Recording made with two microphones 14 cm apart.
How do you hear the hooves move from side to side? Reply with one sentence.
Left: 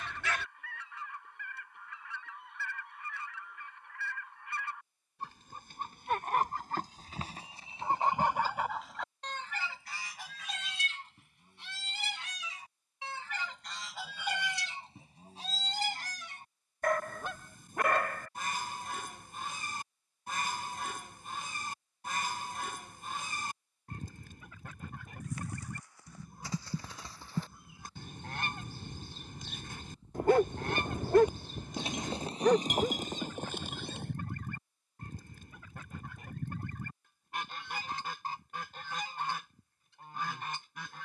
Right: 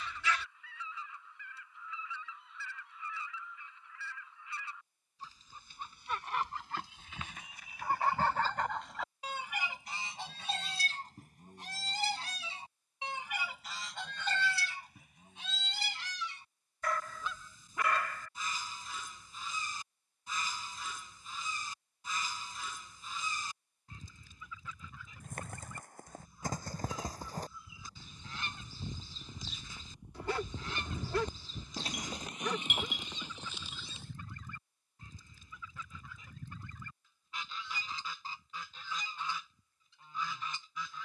In this clip you hear the hooves move from right to left.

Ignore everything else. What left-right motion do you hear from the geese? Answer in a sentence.
You can hear the geese go right and come back.